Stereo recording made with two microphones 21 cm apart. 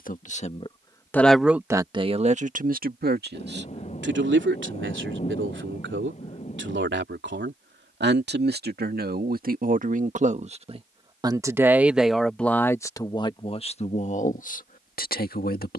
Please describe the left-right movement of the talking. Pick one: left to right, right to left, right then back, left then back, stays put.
right then back.